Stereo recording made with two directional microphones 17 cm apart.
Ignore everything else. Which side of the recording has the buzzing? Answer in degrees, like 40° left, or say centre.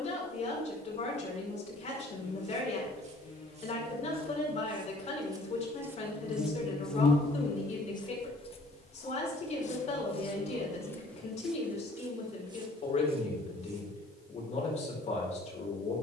40° left.